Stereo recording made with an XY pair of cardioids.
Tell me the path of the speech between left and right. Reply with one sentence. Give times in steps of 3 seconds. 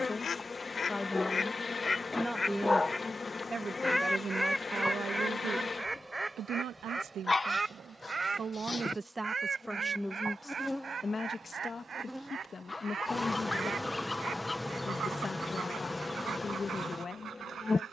In this clip you hear the speech in the centre from 0 s, on the right from 3 s, in the centre from 9 s and on the left from 12 s.